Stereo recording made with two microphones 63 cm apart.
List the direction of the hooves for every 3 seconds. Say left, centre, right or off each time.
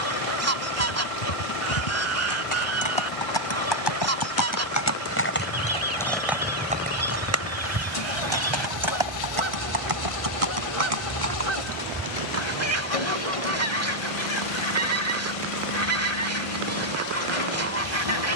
left, left, right, right, right, off.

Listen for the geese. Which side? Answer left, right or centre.
right.